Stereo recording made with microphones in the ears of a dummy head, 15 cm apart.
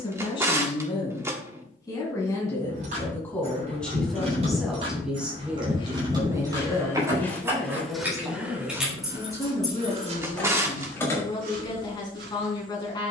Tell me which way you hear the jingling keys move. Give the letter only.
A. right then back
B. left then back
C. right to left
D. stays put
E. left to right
C.